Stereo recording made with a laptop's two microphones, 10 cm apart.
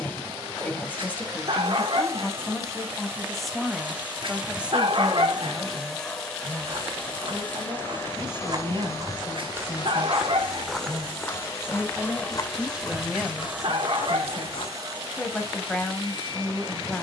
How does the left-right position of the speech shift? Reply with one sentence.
You can hear the speech move from left to right and back again.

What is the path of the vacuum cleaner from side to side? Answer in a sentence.
In this clip you hear the vacuum cleaner move from right to left and back again.